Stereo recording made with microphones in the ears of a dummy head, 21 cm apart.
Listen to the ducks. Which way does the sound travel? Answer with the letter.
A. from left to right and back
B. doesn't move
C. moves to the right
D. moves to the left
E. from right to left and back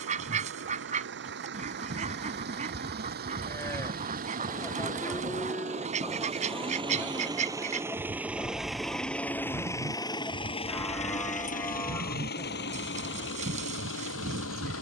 B.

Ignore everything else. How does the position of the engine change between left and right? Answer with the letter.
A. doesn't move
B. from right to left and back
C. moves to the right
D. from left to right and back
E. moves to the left
E.